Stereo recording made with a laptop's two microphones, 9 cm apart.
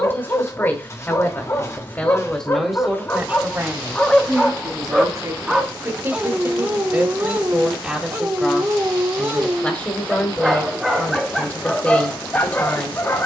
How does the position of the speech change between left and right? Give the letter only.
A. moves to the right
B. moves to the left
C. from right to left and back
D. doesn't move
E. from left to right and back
E.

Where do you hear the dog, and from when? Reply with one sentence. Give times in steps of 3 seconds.
You can hear the dog on the left from 0 s, in the centre from 3 s, on the right from 6 s, in the centre from 9 s and on the left from 12 s.